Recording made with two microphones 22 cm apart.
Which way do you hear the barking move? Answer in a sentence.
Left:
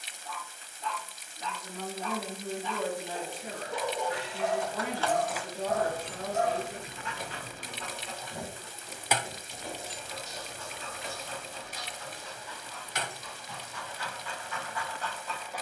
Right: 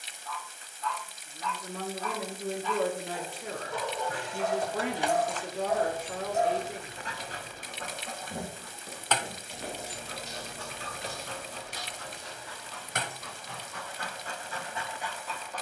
You can hear the barking go right and come back.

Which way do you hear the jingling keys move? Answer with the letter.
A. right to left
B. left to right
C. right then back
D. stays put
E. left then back
E.